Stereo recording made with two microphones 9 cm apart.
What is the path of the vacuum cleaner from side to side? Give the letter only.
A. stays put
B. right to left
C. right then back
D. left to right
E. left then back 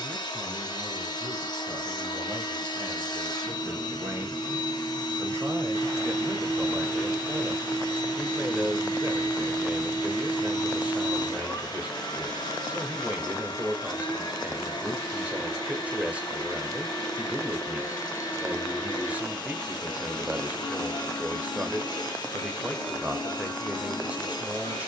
A.